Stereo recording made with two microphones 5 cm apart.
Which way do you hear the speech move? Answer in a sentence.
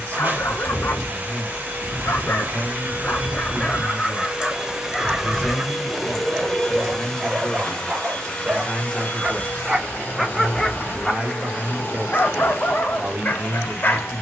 In this clip you hear the speech travel towards the right.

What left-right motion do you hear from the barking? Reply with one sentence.
You can hear the barking move from left to right and back again.